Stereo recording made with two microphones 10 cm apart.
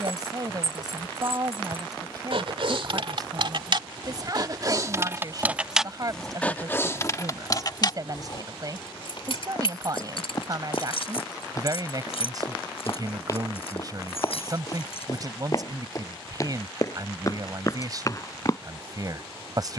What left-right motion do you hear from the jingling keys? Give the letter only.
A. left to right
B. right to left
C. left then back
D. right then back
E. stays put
B.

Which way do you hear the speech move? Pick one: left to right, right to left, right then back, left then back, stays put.
stays put.